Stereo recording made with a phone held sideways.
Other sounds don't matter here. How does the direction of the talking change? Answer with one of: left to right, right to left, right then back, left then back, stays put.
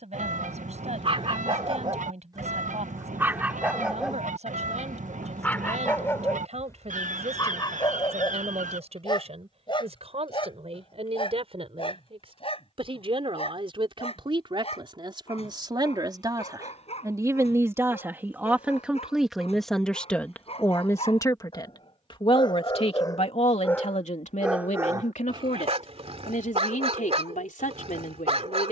right to left.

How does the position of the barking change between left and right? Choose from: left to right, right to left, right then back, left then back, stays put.
left then back.